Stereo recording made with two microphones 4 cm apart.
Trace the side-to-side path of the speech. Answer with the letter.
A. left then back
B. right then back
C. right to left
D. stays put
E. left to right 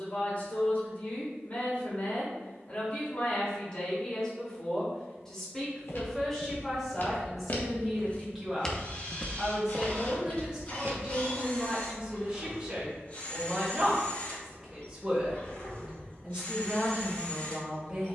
E.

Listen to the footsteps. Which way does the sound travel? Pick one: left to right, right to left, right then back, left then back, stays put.
left to right.